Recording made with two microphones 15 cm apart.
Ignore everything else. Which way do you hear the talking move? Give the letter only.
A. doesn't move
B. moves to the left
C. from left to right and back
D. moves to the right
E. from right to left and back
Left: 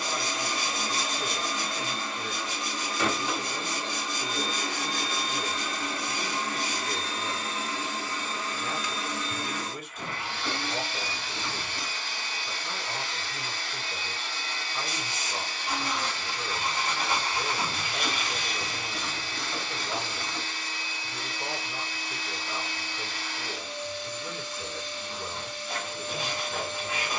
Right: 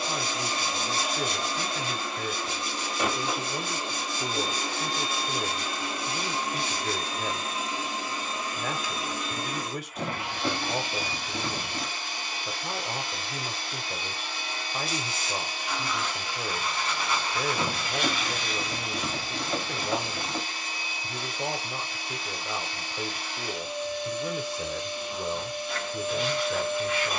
A.